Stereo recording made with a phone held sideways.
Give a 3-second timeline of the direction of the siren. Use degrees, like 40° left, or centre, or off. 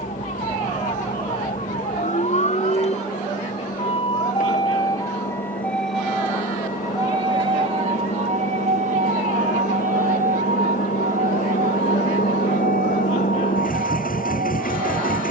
60° left, 30° left, 30° right, 70° right, 80° right.